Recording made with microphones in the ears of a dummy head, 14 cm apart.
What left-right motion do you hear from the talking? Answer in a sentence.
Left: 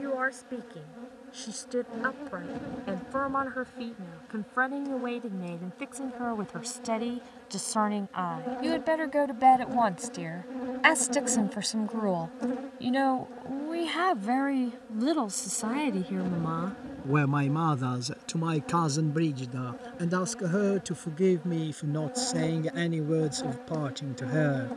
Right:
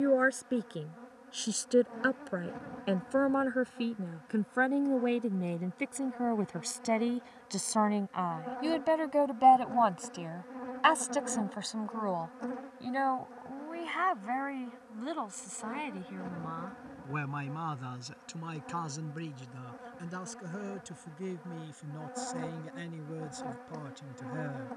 You can hear the talking move to the left.